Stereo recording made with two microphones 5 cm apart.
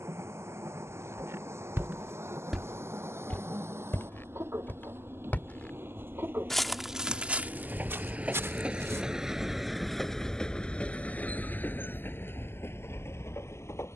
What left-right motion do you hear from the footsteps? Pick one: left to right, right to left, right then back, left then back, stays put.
left then back.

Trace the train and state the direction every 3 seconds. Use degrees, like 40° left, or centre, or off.
60° right, 60° right, 40° right, 10° left, 50° left.